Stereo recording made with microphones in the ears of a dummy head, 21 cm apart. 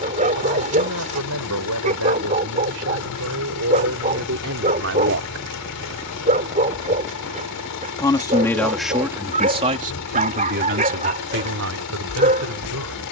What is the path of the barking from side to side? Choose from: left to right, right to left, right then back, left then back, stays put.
stays put.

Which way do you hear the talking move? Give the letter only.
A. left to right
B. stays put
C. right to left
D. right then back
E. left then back
E.